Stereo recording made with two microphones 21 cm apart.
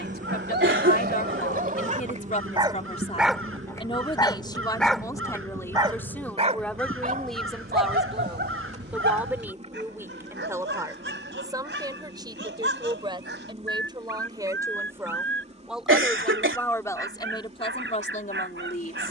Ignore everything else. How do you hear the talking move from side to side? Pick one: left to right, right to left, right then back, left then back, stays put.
right then back.